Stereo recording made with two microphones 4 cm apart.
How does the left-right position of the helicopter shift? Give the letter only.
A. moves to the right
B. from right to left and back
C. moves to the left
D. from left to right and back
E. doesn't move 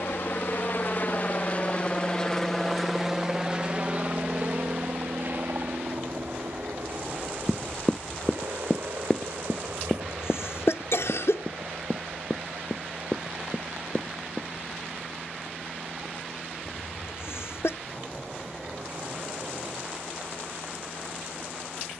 A.